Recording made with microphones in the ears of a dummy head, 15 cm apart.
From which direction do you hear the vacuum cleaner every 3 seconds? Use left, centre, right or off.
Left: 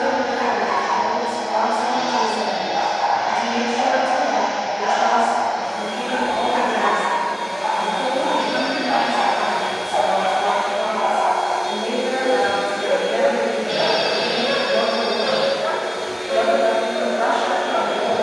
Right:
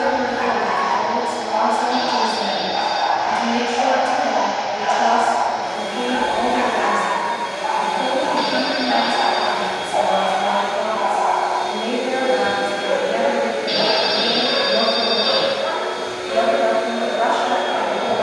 left, centre, centre, left, left, left.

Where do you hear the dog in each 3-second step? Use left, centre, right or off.
right, right, right, centre, left, left.